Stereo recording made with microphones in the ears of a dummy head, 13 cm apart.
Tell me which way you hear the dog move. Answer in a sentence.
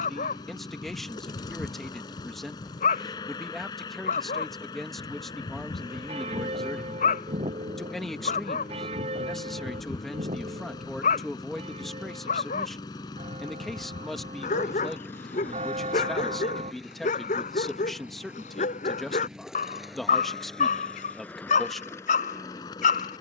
You can hear the dog stay in one place.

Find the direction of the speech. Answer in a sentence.
You can hear the speech in the centre.